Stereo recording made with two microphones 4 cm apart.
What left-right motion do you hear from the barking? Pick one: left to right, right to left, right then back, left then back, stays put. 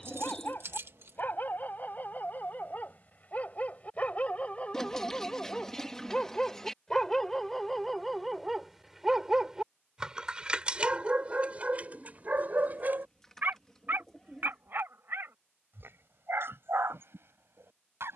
left to right.